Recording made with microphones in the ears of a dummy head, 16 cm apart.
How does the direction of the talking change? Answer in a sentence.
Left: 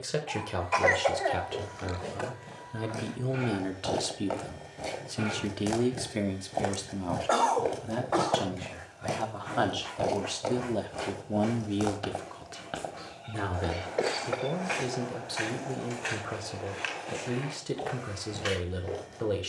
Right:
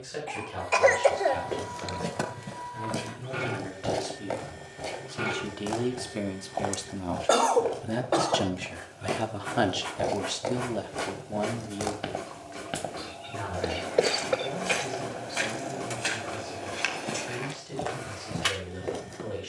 In this clip you hear the talking go right and come back.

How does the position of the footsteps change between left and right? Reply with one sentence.
In this clip you hear the footsteps go left and come back.